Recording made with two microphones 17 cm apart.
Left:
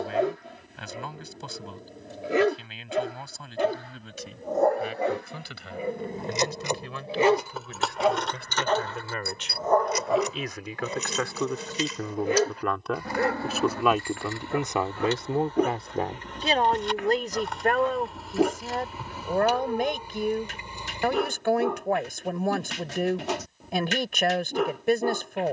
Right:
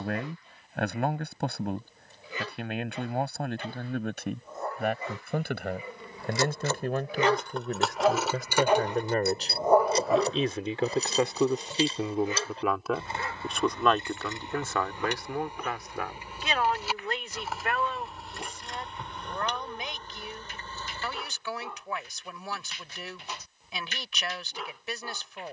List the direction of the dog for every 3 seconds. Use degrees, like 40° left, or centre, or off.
80° left, 70° left, 20° left, 20° left, 70° left, 80° left, 80° left, 80° left, 80° left.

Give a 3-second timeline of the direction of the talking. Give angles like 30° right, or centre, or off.
60° right, 60° right, 50° right, 30° right, centre, 40° left, 50° left, 60° left, 60° left.